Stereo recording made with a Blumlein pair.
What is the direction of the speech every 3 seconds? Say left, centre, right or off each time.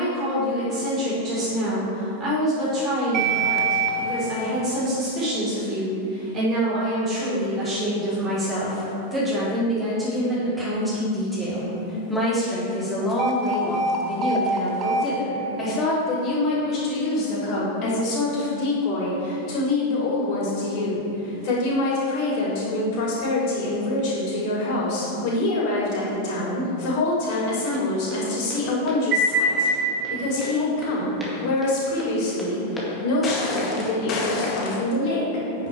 right, right, right, centre, centre, left, left, left, left, left, left, left.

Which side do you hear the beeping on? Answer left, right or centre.
right.